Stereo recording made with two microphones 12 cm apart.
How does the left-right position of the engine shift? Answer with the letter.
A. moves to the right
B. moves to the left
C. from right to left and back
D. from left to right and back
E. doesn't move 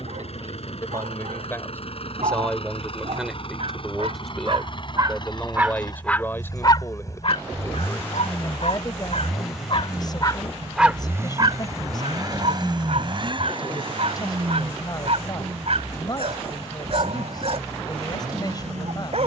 A.